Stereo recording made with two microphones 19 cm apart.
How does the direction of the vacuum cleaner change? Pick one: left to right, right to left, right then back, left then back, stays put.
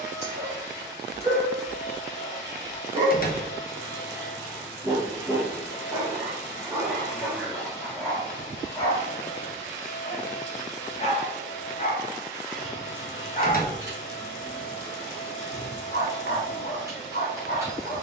stays put.